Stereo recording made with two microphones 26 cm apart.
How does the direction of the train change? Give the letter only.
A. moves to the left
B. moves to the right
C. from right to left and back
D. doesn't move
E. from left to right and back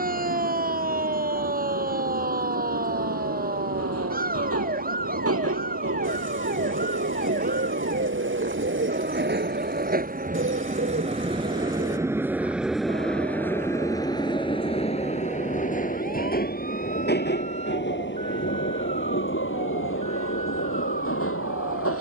A.